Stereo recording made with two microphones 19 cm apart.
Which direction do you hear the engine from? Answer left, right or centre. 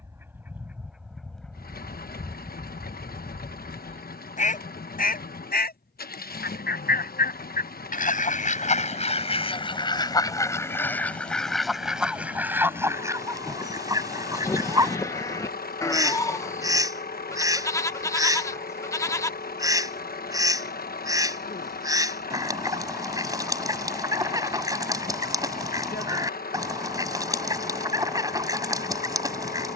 left.